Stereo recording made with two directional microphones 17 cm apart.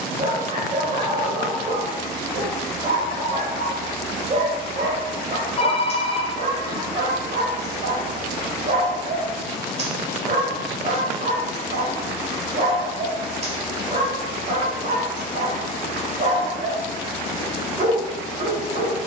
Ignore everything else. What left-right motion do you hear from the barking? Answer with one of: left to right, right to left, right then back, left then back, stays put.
stays put.